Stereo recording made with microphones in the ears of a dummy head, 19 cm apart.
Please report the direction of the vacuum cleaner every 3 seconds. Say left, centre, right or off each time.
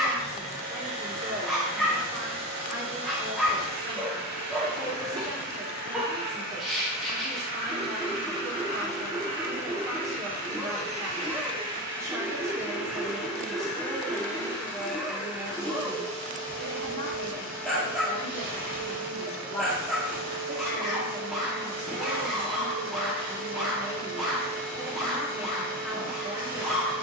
right, right, right, right, centre, right, right, right, right.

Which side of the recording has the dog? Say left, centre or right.
centre.